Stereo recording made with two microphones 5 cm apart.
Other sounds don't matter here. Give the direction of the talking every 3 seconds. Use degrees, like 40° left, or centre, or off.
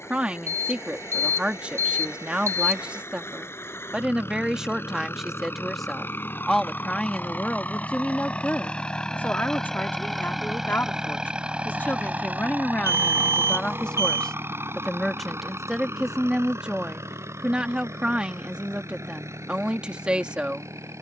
20° right, 10° right, 20° left, 40° left, 30° left, 10° right, 20° right.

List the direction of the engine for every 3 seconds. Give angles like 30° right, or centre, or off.
60° left, 50° left, 30° left, centre, 40° right, 60° right, 70° right.